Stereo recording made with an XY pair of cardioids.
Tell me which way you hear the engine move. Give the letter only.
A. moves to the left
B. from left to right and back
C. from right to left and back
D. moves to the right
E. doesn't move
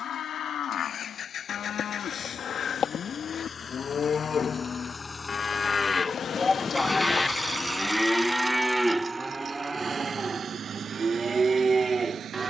D.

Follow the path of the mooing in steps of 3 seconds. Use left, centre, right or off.
left, left, centre, right.